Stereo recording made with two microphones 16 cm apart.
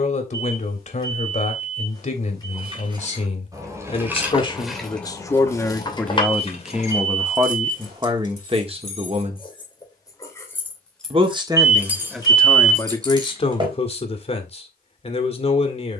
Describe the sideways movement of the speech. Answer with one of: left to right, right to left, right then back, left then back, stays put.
right then back.